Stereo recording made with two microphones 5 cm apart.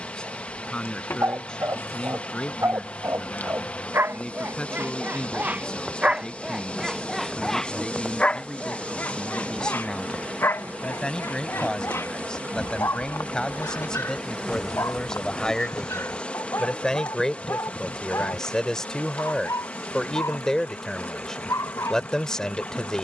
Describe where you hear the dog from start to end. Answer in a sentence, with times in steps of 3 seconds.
In this clip you hear the dog on the right from 0 s, in the centre from 6 s and on the left from 9 s.